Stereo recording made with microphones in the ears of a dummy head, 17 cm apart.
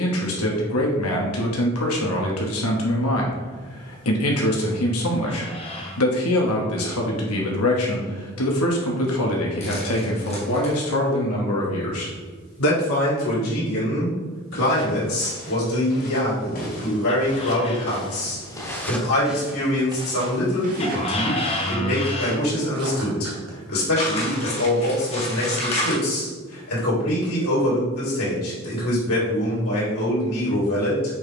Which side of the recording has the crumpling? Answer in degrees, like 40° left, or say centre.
30° left.